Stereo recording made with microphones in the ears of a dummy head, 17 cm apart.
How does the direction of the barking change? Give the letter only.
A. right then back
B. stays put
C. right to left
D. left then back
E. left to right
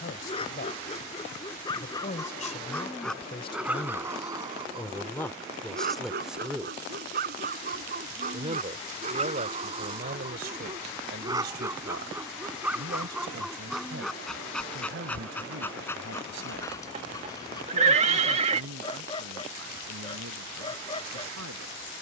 A.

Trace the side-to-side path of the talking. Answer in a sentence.
You can hear the talking move to the right.